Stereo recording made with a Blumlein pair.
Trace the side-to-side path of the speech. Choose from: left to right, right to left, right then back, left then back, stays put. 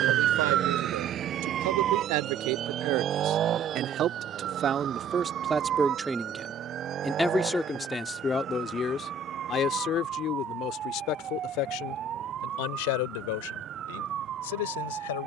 right to left.